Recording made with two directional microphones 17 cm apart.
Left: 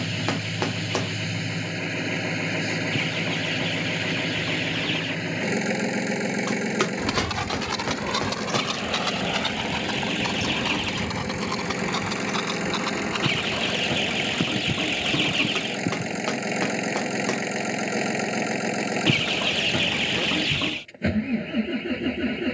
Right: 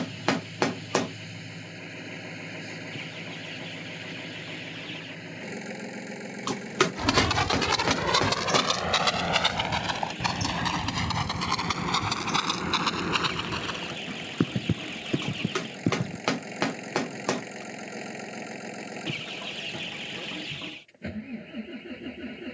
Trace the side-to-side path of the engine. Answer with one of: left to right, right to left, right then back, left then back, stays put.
stays put.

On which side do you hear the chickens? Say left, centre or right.
left.